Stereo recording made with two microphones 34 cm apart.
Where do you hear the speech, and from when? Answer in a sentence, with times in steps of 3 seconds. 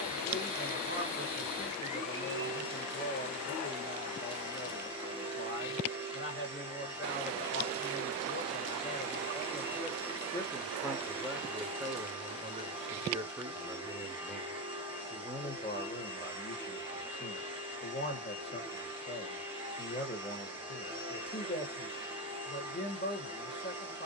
You can hear the speech on the left from 0 s, in the centre from 9 s and on the left from 15 s.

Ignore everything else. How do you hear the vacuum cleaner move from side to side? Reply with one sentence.
In this clip you hear the vacuum cleaner stay in one place.